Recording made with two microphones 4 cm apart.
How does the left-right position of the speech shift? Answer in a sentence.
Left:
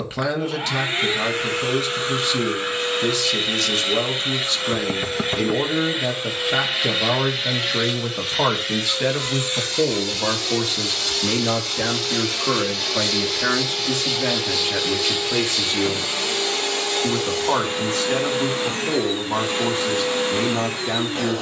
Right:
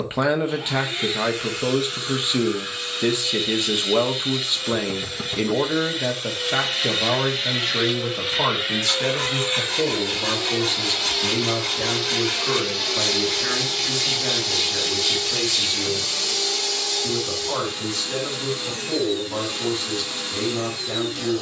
In this clip you hear the speech go from the right side to the left.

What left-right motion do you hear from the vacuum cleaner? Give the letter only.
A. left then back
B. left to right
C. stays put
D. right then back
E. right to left
D.